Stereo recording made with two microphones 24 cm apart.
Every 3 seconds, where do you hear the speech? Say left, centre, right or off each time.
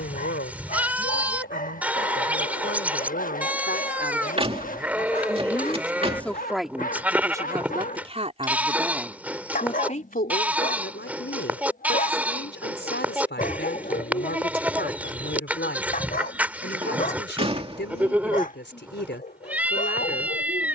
left, left, centre, left, left, left, left.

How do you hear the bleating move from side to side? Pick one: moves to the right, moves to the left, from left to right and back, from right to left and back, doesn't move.
doesn't move.